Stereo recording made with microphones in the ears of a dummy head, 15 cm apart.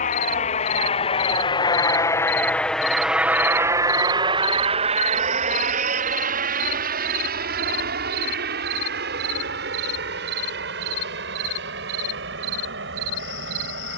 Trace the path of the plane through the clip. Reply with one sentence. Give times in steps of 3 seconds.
In this clip you hear the plane on the left from 0 s and on the right from 3 s.